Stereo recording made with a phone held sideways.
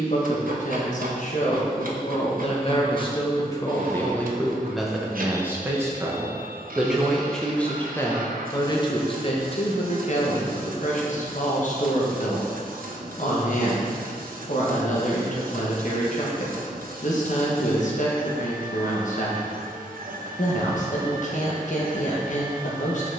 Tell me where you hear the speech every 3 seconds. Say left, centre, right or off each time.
left, centre, centre, left, left, left, left, left.